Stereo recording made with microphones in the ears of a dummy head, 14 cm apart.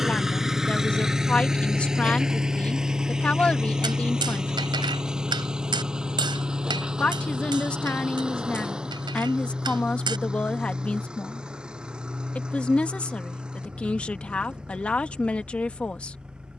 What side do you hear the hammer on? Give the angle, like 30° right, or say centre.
30° right.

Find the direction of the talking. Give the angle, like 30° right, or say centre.
10° left.